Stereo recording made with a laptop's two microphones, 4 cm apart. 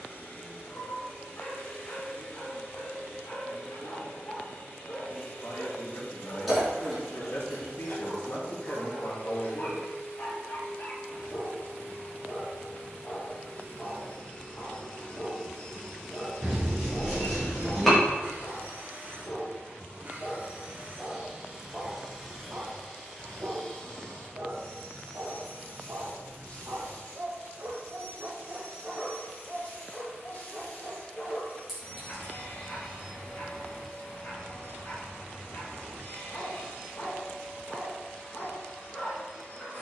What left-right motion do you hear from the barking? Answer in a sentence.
You can hear the barking move from left to right and back again.